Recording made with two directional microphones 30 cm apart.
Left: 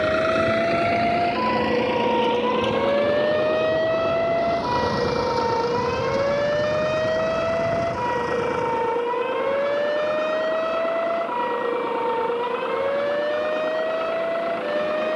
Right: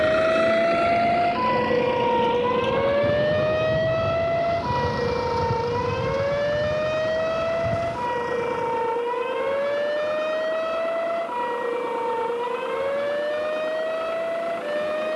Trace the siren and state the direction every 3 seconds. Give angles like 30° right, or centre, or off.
10° right, 20° left, 40° left, 40° left, 50° left.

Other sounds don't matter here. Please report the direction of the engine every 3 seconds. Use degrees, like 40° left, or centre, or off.
20° left, 50° left, 60° left, 60° left, 70° left.